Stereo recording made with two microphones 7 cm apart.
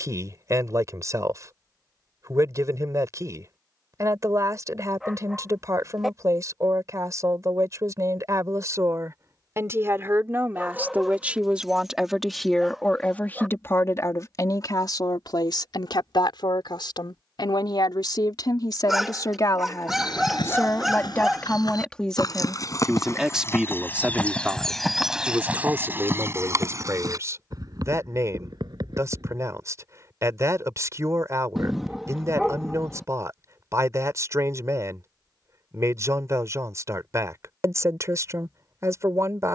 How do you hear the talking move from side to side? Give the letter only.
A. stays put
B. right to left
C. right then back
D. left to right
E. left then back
E.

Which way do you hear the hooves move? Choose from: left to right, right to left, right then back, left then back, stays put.
left to right.